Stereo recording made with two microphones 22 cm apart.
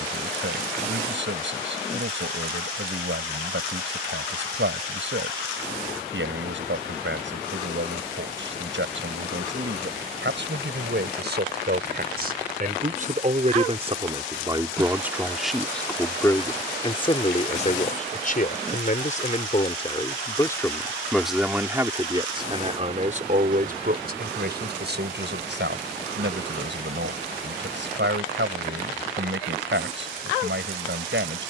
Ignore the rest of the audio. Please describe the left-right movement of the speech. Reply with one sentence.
You can hear the speech go left and come back.